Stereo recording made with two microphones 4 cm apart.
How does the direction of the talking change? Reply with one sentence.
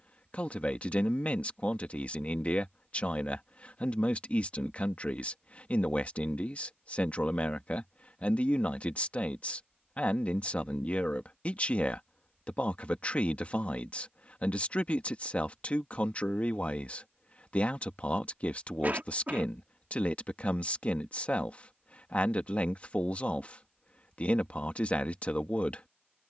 You can hear the talking stay in one place.